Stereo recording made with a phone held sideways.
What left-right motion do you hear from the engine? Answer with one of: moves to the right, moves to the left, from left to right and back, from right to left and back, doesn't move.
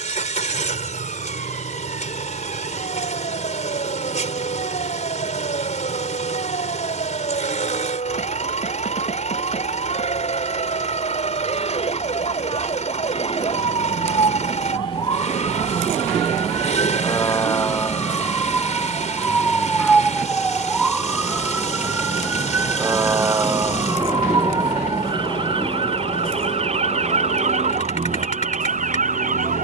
doesn't move.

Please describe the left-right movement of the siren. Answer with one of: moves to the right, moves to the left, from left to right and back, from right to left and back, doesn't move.
moves to the right.